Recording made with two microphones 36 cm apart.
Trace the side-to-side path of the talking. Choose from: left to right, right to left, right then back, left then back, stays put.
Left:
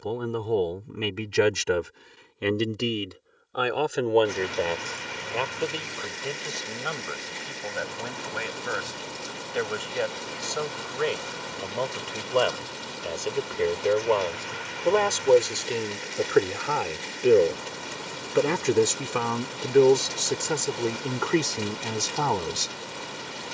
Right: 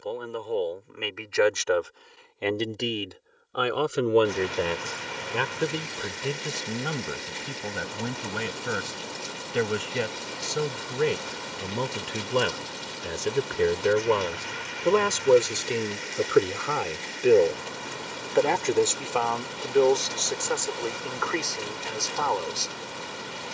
right then back.